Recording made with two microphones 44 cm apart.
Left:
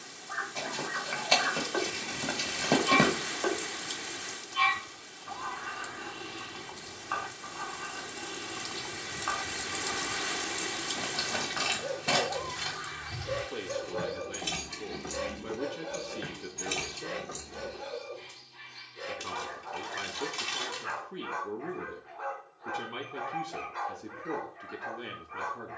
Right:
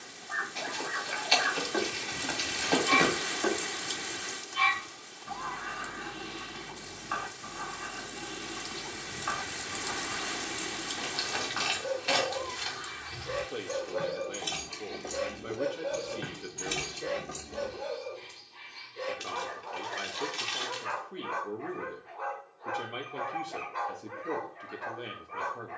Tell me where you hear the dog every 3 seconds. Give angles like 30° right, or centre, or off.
40° right, 40° right, 40° right, 30° right, centre, 20° left, 30° left, 30° left, 30° left.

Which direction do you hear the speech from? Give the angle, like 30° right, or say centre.
10° left.